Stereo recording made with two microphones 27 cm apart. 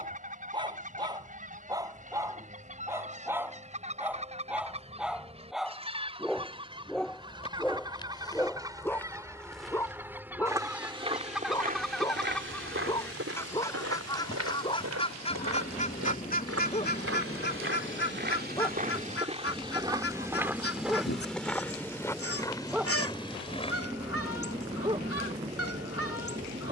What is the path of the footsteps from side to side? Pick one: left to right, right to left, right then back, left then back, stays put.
right then back.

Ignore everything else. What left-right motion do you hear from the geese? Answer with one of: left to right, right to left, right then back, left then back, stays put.
right to left.